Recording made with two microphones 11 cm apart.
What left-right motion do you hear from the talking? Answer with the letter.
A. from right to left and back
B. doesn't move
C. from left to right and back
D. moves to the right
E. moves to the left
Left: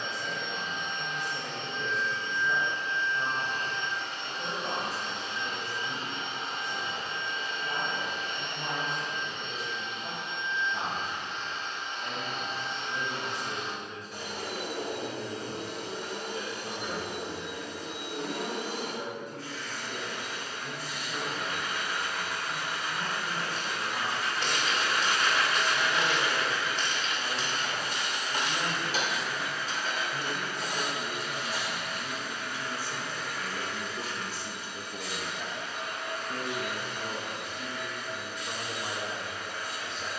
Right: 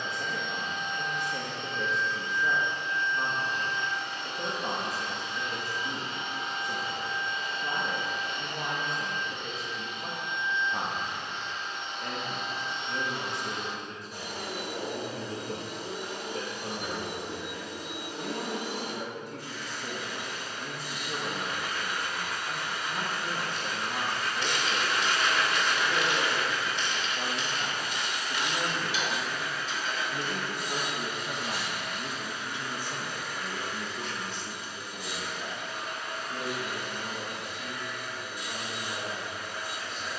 E.